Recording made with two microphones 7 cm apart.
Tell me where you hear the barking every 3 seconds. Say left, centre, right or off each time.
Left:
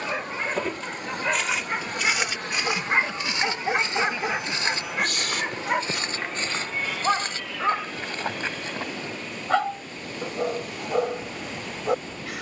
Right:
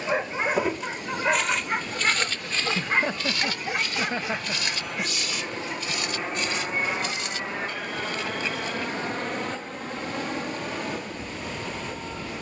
centre, left, left, left.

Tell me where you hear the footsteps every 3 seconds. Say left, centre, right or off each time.
centre, left, left, off.